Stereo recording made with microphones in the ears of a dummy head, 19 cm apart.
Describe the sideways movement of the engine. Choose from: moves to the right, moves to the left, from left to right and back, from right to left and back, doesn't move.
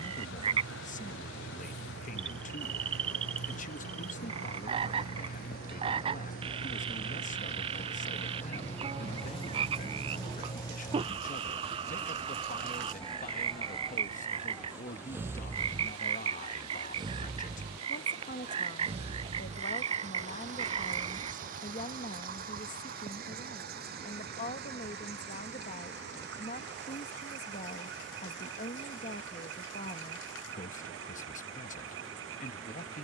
moves to the right.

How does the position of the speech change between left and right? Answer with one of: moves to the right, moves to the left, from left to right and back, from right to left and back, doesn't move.
doesn't move.